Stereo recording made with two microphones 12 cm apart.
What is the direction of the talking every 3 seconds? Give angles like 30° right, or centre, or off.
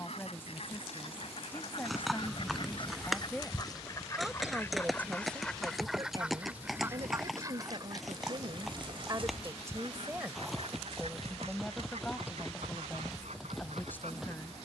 20° left, 10° right, 50° right, 10° right, 20° left.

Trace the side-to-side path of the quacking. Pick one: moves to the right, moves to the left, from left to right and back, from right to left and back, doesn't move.
moves to the right.